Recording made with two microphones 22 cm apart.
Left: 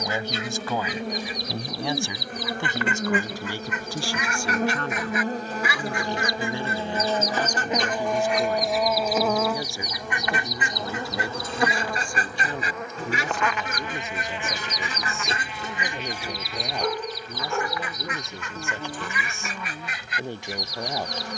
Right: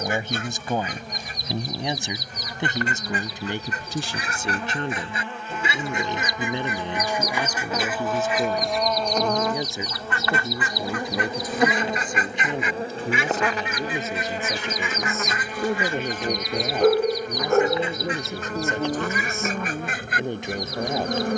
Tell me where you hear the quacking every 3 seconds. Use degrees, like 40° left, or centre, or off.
50° right, 30° right, 10° right, 20° left, 40° left, centre, 50° right.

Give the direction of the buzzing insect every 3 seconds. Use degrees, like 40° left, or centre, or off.
60° left, 40° left, 20° left, 10° right, 40° right, 50° right, 50° right.